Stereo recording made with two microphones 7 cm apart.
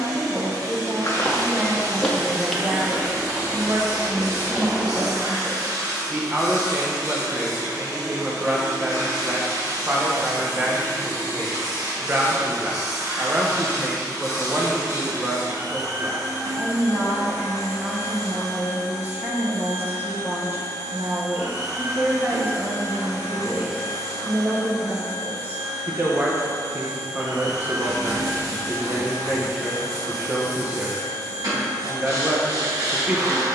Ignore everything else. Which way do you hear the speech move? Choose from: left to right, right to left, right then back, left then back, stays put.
stays put.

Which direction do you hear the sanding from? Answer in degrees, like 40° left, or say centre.
60° right.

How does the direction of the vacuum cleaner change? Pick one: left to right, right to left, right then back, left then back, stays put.
stays put.